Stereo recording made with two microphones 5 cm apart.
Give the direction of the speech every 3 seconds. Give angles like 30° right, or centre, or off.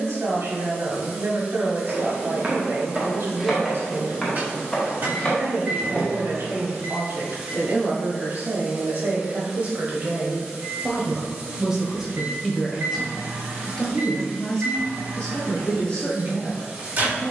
60° right, 60° right, 50° right, 30° right, 10° left, 20° left.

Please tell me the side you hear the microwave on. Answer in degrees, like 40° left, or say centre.
40° right.